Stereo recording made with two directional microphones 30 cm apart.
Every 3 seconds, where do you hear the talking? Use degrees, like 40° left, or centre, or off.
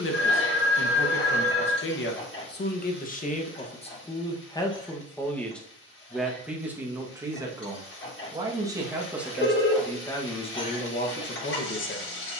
40° left, 20° left, 10° right, 20° left.